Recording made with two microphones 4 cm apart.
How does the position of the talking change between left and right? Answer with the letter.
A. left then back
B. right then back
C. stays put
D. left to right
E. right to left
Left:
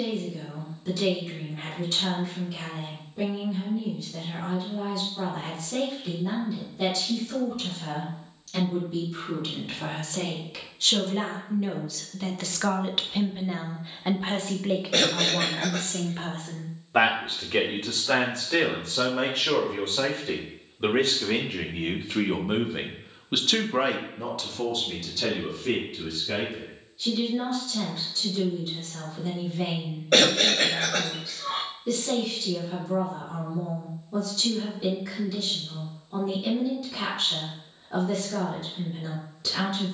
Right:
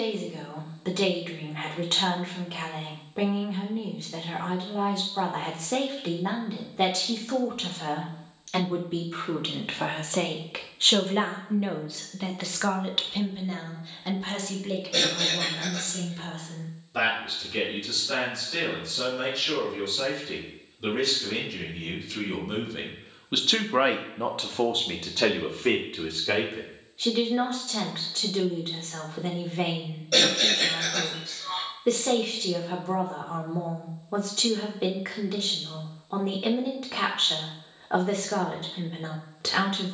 A.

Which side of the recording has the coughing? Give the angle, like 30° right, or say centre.
50° left.